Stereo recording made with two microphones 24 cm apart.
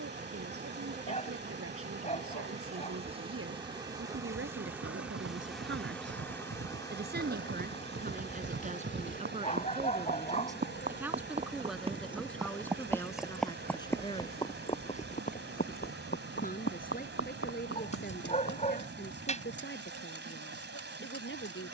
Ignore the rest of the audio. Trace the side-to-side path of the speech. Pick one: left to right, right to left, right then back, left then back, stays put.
right to left.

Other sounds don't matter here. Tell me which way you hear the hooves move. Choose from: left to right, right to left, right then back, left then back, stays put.
right to left.